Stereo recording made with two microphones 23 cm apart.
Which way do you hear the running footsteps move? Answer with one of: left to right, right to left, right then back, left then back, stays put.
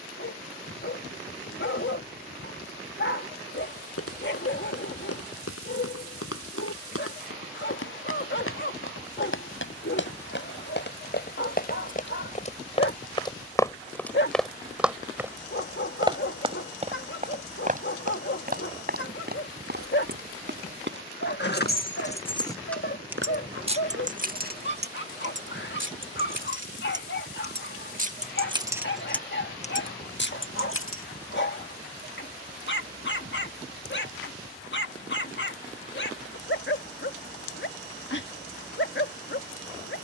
left to right.